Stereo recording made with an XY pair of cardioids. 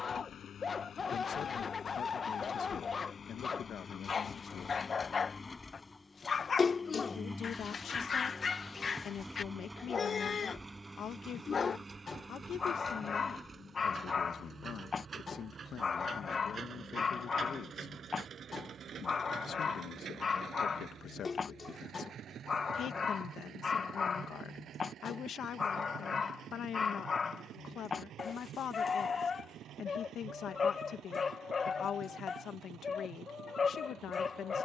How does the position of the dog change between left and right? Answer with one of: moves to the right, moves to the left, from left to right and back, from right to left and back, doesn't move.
doesn't move.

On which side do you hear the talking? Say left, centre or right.
left.